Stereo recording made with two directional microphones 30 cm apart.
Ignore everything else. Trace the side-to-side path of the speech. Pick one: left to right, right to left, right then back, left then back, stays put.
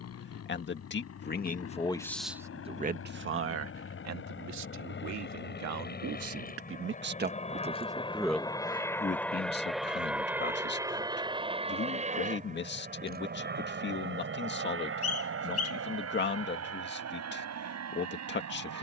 right then back.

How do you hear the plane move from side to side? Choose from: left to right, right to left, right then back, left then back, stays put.
left to right.